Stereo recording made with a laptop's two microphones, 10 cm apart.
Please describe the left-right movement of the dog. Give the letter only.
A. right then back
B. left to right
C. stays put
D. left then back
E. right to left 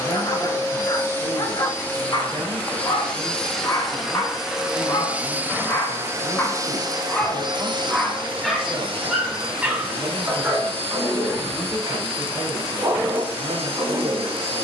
B.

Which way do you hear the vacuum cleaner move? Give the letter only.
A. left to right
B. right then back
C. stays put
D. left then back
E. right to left
A.